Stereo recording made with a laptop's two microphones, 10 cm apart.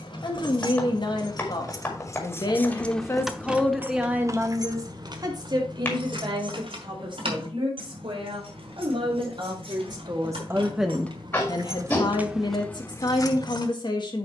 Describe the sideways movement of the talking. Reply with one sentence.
You can hear the talking go right and come back.